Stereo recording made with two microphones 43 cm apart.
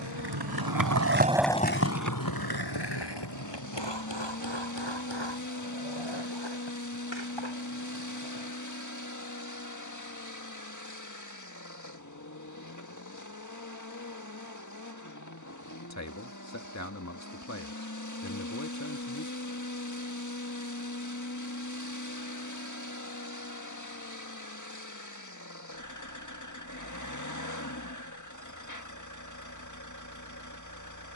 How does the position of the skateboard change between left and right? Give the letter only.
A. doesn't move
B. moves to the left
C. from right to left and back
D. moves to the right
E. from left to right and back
B.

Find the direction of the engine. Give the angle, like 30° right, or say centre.
40° left.